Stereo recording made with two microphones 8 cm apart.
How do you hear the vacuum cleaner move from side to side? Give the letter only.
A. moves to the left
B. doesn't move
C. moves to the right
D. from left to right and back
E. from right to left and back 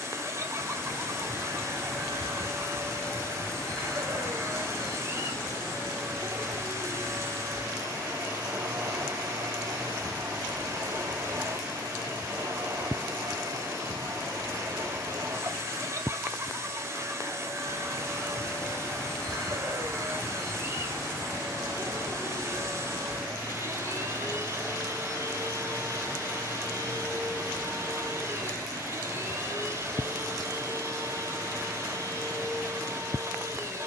B.